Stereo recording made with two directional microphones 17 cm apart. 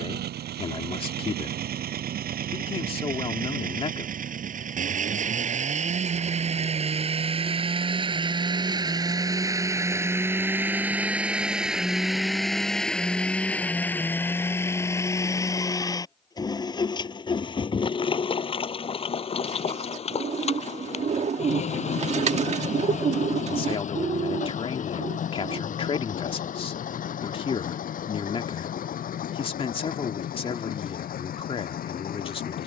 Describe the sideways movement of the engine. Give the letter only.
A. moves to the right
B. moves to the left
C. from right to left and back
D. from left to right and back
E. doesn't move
B.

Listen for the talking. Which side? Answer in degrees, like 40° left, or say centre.
30° left.